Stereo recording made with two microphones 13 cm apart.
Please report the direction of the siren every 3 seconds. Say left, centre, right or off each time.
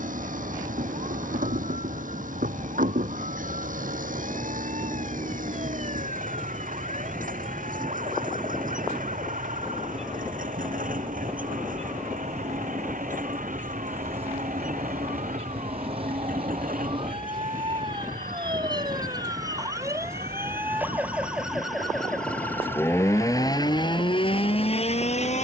right, right, right, right, right, right, right, centre, left.